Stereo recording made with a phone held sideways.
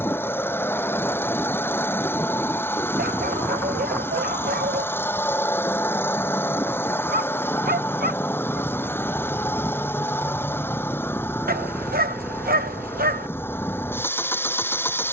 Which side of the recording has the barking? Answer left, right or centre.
right.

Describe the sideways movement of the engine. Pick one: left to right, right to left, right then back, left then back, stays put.
stays put.